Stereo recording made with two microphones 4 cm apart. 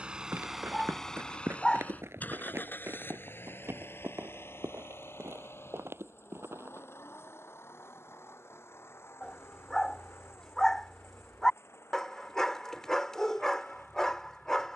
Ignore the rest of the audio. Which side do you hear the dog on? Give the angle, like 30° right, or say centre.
20° left.